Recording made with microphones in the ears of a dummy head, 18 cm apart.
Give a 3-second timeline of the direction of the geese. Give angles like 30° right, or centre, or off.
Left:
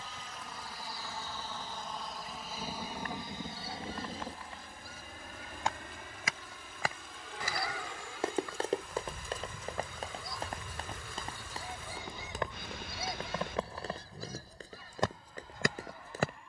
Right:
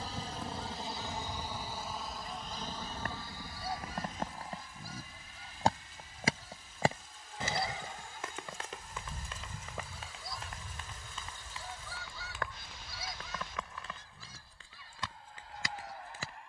50° right, 40° right, 20° right, centre, 30° left, 50° left.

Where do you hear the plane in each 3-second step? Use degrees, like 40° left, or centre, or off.
10° right, 30° left, 50° left, 60° left, 70° left, 70° left.